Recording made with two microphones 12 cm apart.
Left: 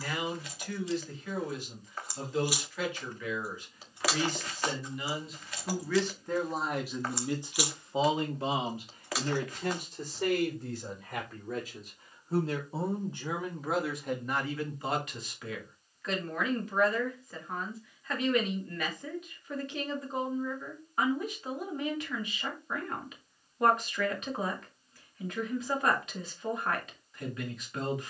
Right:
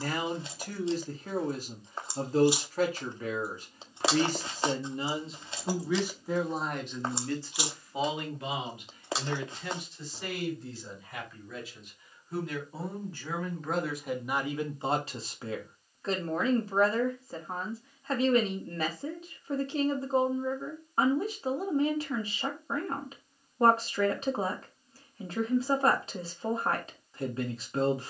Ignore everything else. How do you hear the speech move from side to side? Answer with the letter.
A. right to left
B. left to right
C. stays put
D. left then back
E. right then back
D.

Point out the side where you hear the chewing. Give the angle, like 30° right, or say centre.
30° right.